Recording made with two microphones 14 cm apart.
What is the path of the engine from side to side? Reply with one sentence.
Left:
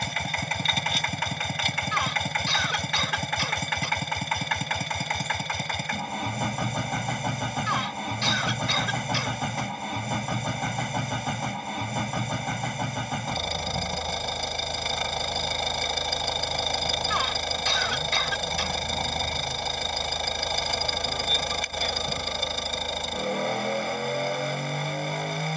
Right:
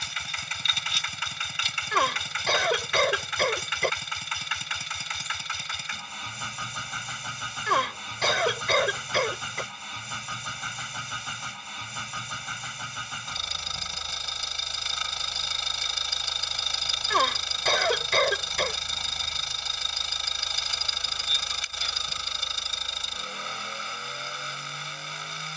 You can hear the engine stay in one place.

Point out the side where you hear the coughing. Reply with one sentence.
In this clip you hear the coughing on the right.